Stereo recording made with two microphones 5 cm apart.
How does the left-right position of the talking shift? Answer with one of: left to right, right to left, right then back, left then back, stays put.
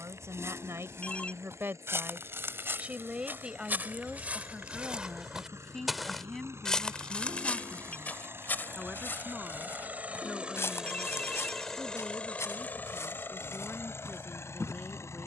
right to left.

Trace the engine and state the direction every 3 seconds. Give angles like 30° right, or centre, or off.
70° right, 70° right, 60° right, 20° right, 50° left.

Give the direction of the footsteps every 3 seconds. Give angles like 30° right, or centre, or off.
60° right, 30° right, 30° left, 60° left, 70° left.